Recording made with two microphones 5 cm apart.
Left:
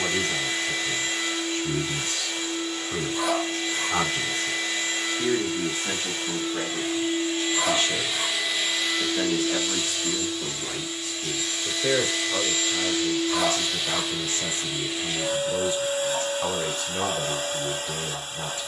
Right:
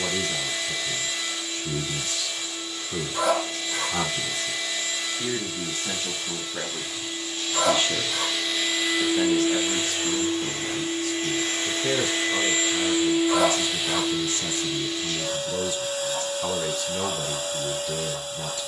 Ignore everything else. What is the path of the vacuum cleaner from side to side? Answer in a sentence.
You can hear the vacuum cleaner go right and come back.